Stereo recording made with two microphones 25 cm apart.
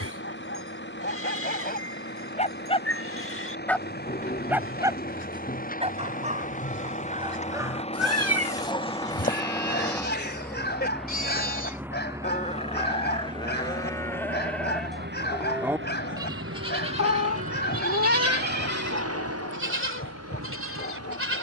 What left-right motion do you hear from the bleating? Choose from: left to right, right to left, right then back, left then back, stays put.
left to right.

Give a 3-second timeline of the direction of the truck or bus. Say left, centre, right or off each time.
left, left, left, centre, right, right, right.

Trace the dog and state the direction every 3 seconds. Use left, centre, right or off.
left, centre, centre, left, left, left, left.